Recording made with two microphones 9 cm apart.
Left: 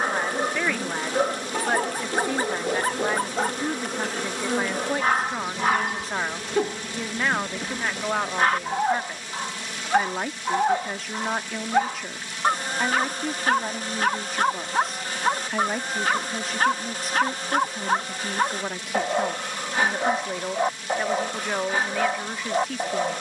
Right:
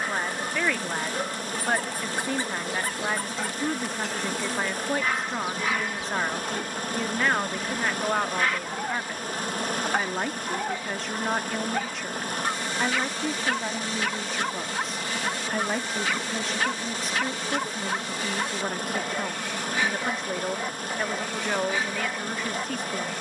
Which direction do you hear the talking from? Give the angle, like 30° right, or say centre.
centre.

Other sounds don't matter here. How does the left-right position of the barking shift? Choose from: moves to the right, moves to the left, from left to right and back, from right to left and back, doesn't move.
doesn't move.